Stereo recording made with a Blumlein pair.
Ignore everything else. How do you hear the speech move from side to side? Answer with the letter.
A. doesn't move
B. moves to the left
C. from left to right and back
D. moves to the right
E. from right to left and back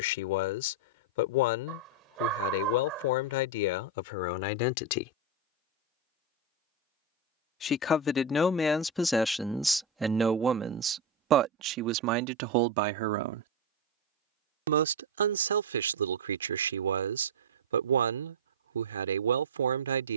D.